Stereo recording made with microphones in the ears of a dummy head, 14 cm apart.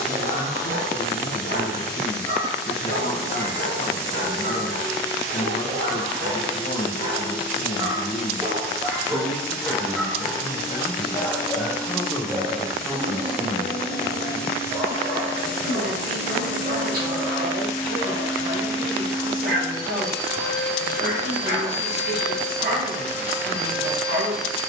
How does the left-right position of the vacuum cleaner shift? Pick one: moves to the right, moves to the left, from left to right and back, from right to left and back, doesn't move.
doesn't move.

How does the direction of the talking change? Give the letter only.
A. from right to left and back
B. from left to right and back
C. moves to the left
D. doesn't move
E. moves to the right
E.